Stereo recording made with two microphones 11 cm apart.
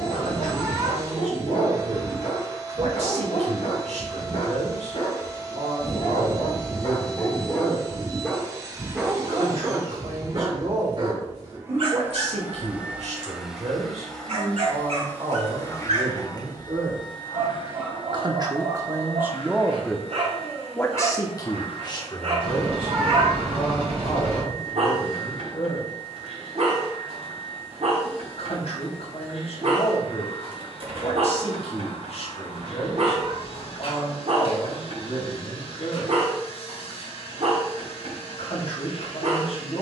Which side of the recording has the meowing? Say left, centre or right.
right.